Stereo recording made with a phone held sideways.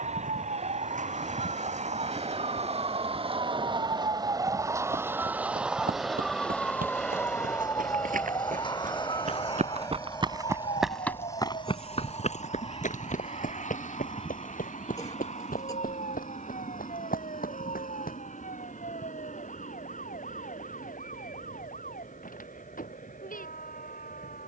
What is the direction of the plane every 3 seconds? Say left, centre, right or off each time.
right, right, centre, left, left, left, left, left.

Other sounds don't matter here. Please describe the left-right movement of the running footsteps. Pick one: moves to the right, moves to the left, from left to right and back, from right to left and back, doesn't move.
moves to the left.